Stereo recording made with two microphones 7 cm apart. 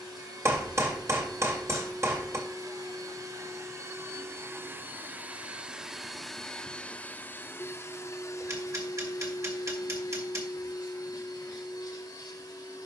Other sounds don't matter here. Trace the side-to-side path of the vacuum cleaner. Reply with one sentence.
You can hear the vacuum cleaner move to the left.